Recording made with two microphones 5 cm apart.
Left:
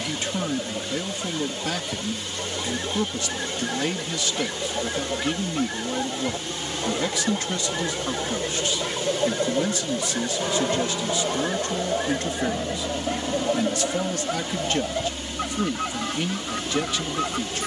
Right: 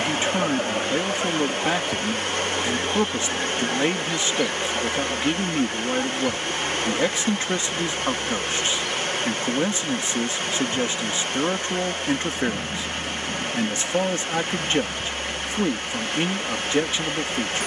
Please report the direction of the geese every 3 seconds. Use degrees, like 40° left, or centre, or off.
20° right, 10° left, 30° left, 50° left, 60° left, 70° left.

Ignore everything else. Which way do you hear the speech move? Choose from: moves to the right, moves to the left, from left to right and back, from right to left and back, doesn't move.
doesn't move.